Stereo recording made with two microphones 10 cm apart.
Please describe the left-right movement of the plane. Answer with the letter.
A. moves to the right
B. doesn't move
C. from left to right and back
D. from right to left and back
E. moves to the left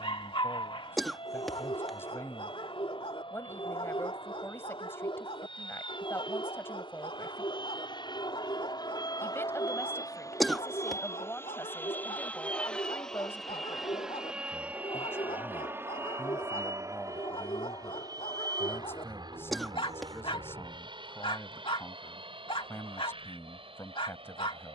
A.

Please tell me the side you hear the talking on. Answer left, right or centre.
left.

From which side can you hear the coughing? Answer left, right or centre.
centre.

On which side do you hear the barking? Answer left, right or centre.
left.